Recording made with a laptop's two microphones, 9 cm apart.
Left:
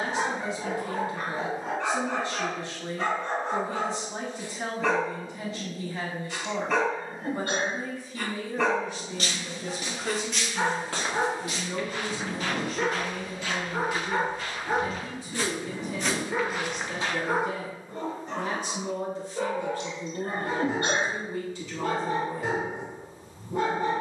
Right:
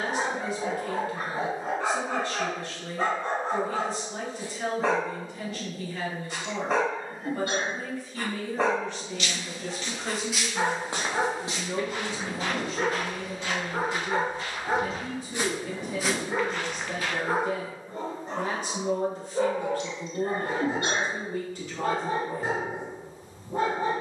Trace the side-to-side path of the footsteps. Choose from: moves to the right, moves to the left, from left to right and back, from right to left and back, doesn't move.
from left to right and back.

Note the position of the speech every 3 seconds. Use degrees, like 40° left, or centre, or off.
20° left, 20° left, 20° left, 10° right, 30° right, 50° right, 50° right, 50° right.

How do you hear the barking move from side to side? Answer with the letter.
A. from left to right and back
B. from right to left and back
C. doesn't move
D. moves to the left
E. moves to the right
C.